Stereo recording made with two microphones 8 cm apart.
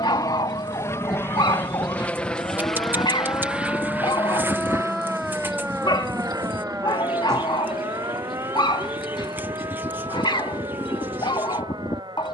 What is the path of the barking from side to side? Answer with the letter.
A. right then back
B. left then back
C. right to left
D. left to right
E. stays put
E.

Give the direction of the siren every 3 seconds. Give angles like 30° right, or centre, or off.
60° left, 10° left, 40° right, 50° right.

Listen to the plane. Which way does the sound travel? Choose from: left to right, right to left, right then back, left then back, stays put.
left to right.